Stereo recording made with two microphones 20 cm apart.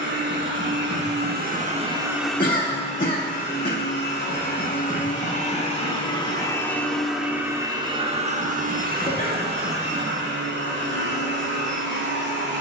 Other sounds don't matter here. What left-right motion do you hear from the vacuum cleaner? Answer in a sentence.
In this clip you hear the vacuum cleaner go left and come back.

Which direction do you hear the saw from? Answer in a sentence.
You can hear the saw on the right.